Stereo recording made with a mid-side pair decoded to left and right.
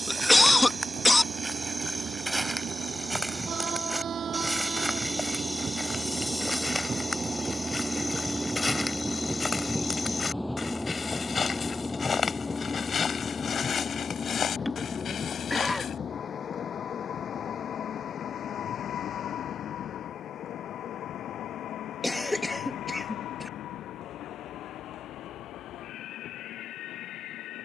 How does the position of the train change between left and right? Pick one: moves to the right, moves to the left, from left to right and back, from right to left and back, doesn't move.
moves to the left.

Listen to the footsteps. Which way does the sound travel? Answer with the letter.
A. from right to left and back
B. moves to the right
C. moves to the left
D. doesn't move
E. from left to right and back
C.